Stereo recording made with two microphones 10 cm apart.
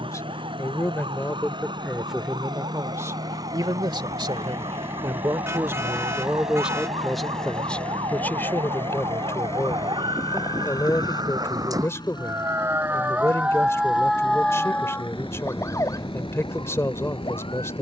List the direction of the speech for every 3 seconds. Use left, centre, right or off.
centre, right, centre, left, left, left.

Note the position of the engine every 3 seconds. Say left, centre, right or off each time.
right, right, centre, left, left, left.